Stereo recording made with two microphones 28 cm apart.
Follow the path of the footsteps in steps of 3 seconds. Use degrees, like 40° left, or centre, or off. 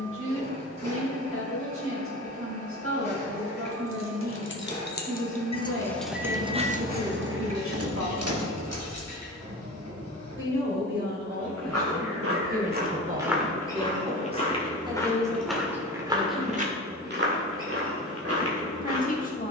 off, off, off, 70° right, 10° right, 20° right, 60° right.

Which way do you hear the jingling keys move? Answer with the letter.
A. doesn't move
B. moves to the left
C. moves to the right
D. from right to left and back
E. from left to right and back
C.